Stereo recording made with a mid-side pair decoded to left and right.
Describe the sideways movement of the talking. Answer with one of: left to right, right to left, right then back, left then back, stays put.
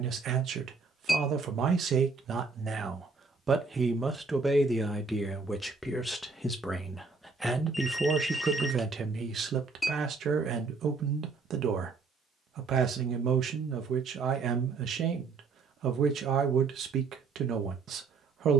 left then back.